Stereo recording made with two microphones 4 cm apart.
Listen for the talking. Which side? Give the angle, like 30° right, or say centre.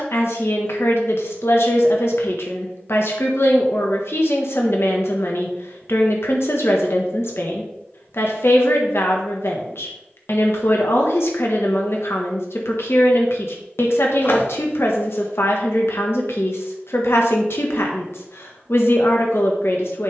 80° left.